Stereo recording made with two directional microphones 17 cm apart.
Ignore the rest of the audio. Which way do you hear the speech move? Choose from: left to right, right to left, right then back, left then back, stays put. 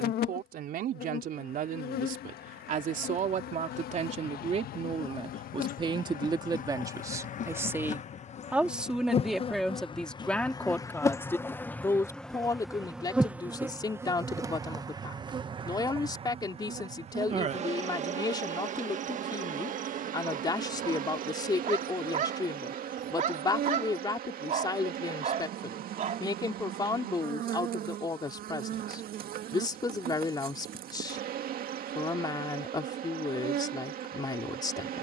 right to left.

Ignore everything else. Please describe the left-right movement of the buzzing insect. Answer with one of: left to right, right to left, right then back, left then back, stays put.
left to right.